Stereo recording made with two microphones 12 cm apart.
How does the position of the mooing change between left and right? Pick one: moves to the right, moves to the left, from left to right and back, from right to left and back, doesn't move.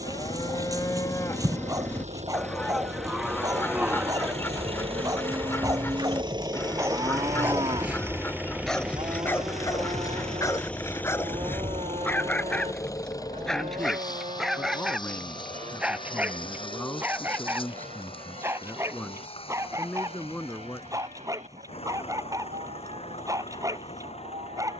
moves to the right.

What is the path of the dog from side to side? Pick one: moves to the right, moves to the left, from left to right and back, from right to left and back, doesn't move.
from right to left and back.